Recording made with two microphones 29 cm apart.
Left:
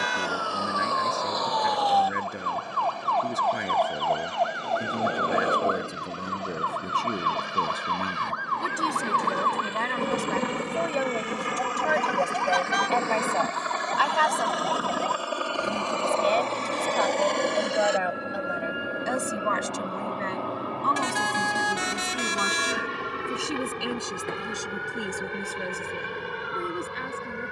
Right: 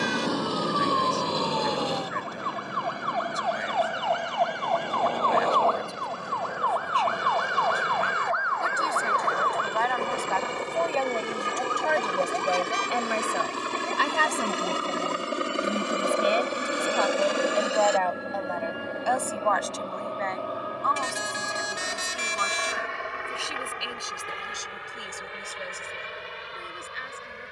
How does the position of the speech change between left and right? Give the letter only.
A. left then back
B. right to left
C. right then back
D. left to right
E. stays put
C.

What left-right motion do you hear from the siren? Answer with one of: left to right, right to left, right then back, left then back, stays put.
right to left.